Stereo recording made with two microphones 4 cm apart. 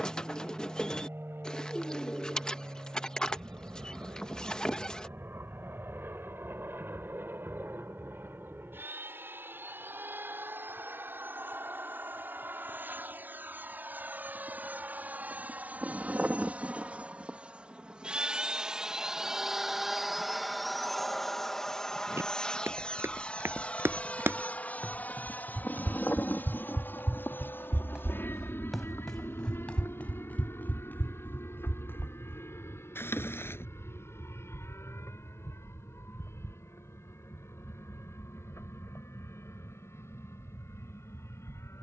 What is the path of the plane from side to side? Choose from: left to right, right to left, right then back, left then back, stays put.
right to left.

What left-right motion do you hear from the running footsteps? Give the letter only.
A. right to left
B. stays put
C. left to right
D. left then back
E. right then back
A.